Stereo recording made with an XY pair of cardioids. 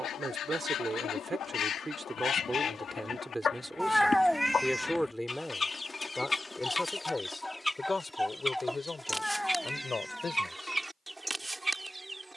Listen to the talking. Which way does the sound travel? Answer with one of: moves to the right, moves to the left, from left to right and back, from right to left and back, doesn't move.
moves to the left.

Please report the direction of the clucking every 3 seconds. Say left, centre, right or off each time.
left, left, centre, centre.